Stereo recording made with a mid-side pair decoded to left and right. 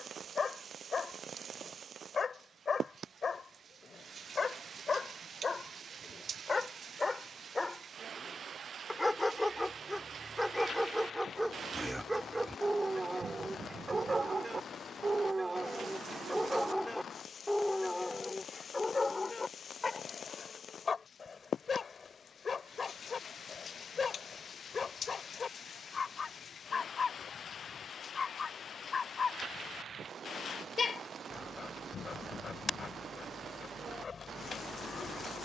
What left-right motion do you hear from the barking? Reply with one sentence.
In this clip you hear the barking move from left to right and back again.